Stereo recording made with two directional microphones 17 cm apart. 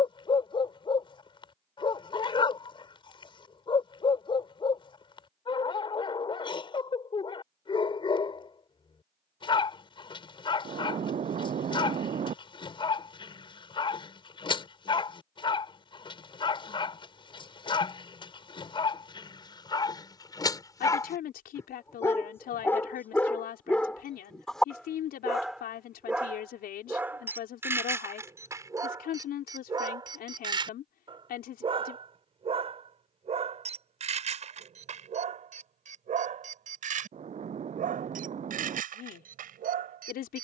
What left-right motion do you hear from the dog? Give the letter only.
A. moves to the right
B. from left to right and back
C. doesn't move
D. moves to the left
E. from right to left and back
A.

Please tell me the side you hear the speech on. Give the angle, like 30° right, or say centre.
60° left.